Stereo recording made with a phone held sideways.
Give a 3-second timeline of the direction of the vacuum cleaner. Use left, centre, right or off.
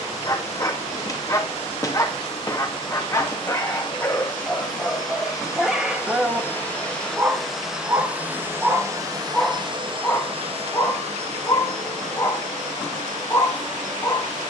left, left, centre, right, right.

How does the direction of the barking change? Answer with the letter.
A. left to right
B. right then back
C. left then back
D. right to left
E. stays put
B.